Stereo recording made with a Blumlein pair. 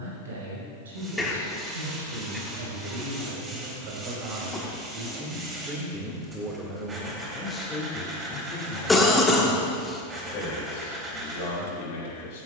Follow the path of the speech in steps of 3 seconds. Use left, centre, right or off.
right, right, centre, left.